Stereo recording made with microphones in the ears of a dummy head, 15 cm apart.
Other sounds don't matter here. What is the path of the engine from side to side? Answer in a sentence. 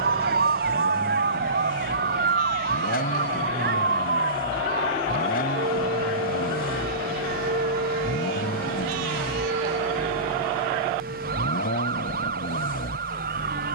In this clip you hear the engine stay put.